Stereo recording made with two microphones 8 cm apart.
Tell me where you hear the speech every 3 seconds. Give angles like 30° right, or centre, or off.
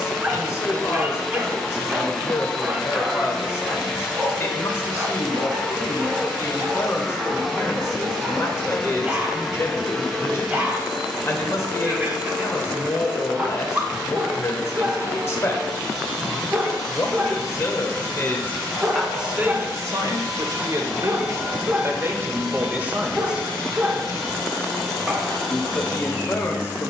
30° left, 30° left, 30° left, 30° left, 30° left, 30° left, 20° right, 20° right, 30° left.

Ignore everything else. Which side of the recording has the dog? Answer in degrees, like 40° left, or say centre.
20° right.